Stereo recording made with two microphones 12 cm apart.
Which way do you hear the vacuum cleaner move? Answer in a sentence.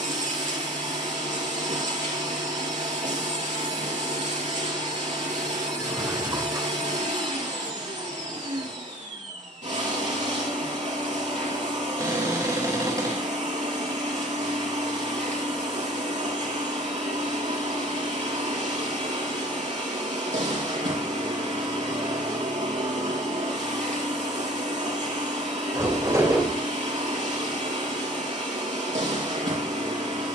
In this clip you hear the vacuum cleaner stay in one place.